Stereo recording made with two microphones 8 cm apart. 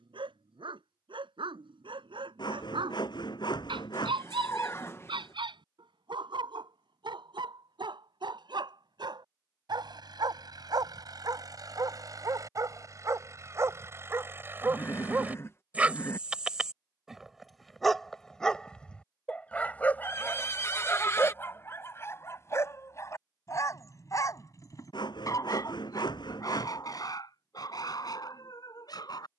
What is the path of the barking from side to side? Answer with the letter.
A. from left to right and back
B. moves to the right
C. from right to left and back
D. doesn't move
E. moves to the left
E.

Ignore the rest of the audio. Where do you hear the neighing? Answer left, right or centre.
left.